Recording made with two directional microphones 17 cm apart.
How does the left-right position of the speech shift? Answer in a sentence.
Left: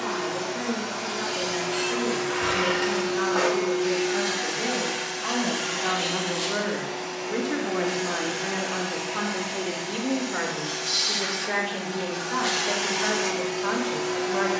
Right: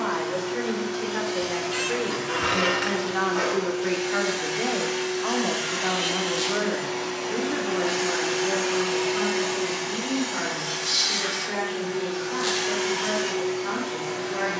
You can hear the speech move to the left.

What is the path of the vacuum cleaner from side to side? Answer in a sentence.
You can hear the vacuum cleaner move from left to right and back again.